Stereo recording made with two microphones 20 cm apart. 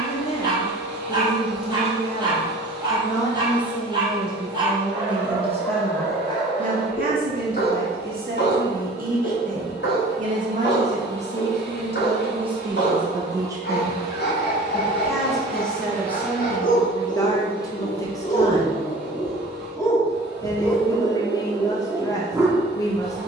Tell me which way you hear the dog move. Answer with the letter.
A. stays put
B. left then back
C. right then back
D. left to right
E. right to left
B.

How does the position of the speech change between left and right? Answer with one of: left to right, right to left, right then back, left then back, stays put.
right then back.